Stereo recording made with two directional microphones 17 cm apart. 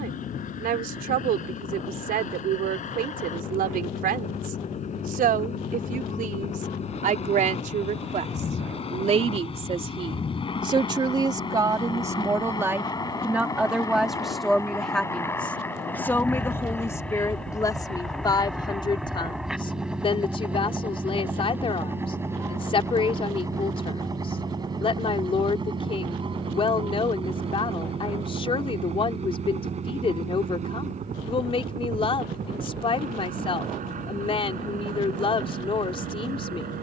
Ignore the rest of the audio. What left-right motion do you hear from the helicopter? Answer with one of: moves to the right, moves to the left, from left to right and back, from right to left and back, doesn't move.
moves to the right.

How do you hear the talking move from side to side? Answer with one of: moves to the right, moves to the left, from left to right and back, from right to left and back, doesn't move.
moves to the left.